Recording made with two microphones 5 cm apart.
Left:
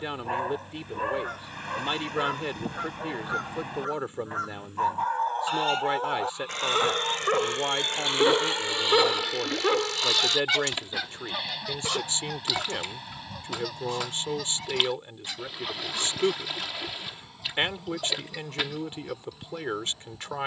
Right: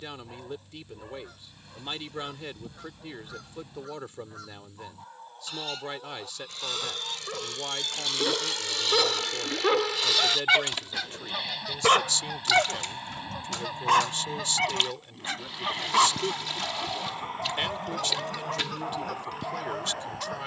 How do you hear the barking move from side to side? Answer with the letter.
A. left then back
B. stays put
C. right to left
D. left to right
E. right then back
D.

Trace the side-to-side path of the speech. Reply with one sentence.
You can hear the speech stay in one place.